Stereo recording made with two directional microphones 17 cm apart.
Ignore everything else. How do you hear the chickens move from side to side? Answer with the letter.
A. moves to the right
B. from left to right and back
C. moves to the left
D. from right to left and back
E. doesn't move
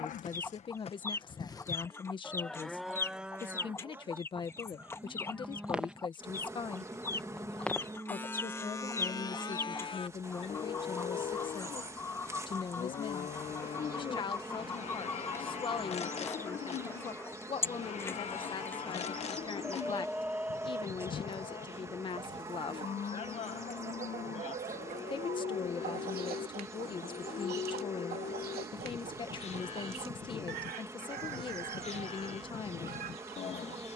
A.